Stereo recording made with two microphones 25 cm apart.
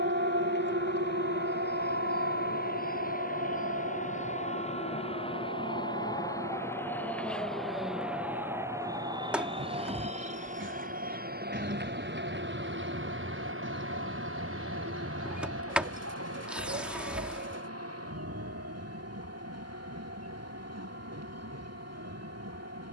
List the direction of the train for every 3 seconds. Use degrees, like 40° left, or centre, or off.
40° left, 30° left, centre, 30° right, 50° right, 70° right, 80° right, 80° right.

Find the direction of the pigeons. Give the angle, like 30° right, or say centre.
50° right.